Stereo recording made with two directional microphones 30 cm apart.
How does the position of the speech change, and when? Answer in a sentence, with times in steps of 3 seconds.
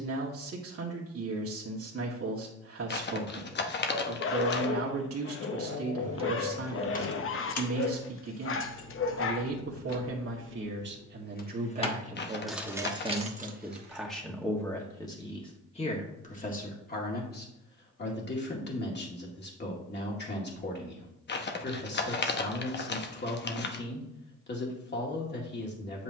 In this clip you hear the speech on the right from 0 s, in the centre from 12 s and on the left from 15 s.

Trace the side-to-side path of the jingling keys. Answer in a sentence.
In this clip you hear the jingling keys go left and come back.